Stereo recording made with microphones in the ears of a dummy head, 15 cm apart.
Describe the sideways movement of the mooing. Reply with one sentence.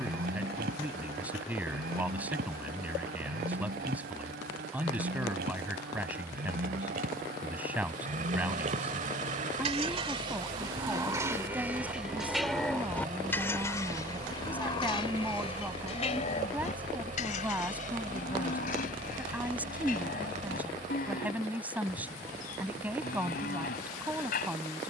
In this clip you hear the mooing travel towards the left.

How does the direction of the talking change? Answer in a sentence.
In this clip you hear the talking stay put.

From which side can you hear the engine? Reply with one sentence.
In this clip you hear the engine on the right.